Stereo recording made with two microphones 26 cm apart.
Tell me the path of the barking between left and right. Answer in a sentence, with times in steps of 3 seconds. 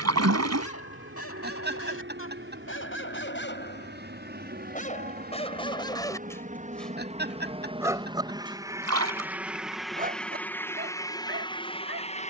You can hear the barking on the left from 0 s, in the centre from 6 s and on the right from 9 s.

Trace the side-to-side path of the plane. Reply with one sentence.
You can hear the plane travel towards the left.